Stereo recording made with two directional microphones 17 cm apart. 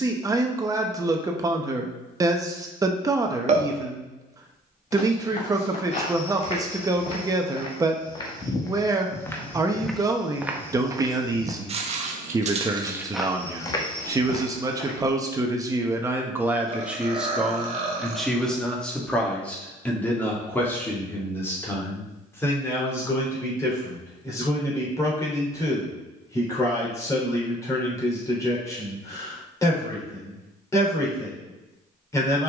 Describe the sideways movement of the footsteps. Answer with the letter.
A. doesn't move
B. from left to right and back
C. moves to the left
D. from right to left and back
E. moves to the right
B.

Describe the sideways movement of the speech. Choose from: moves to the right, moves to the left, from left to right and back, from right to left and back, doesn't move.
moves to the left.